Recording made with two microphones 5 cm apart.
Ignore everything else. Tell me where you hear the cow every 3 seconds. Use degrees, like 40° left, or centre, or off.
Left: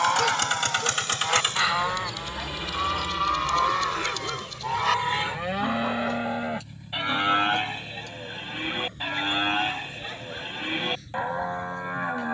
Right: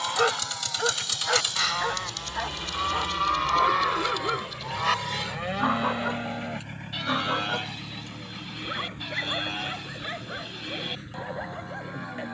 20° left, centre, 30° left, 40° left.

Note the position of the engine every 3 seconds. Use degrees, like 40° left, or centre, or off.
40° left, 20° right, 60° right, 70° right.